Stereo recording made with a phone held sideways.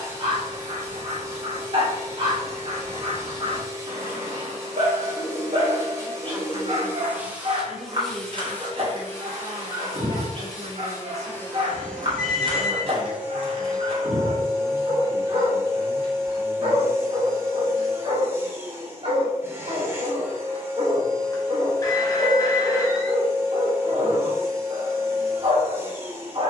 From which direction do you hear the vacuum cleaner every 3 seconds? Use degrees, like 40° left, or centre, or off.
20° right, 20° right, 10° right, 20° left, 10° right, 20° right, 20° right, 20° right, 20° right.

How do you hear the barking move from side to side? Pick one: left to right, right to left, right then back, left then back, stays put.
stays put.